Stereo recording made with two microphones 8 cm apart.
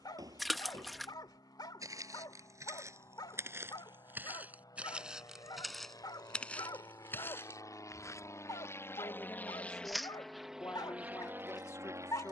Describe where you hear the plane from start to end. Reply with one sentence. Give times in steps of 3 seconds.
You can hear the plane on the left from 0 s and in the centre from 9 s.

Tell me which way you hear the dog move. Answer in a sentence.
You can hear the dog stay in one place.